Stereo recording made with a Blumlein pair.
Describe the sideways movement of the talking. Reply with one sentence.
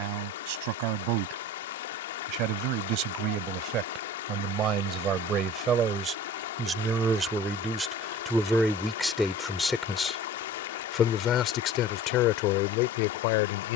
You can hear the talking travel towards the left.